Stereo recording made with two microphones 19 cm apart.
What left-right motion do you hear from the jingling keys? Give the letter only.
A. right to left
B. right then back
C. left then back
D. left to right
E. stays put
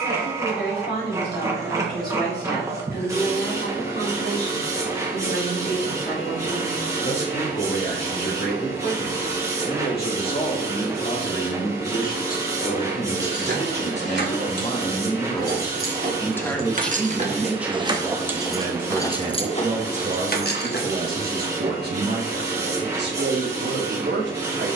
A.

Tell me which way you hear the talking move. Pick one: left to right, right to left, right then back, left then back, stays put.
left to right.